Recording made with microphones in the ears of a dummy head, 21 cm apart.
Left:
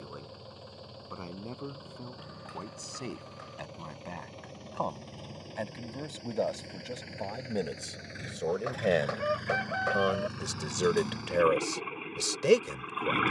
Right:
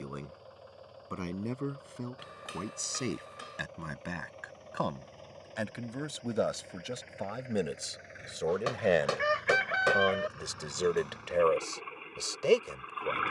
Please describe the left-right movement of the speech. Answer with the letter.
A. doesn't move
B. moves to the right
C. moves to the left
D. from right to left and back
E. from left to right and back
C.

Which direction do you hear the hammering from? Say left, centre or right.
right.